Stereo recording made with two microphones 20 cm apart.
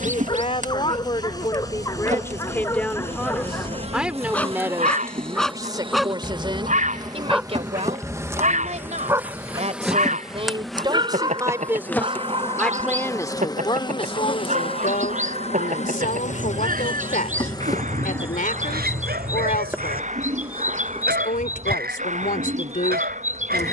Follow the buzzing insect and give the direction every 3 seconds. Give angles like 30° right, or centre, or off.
40° right, 30° right, 20° right, centre, 20° left, 30° left, 10° right, 30° right.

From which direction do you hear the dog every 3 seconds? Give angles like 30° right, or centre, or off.
20° left, 10° left, 10° right, 20° right, 30° right, 40° right, 50° right, 50° right.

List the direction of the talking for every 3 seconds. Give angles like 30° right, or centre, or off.
20° left, 10° right, 30° right, 20° right, 20° left, 40° left, 40° left, 40° left.